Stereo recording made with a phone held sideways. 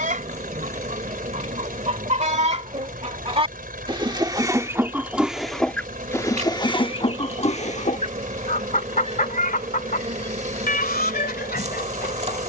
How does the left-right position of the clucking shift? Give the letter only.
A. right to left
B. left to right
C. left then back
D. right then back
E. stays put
A.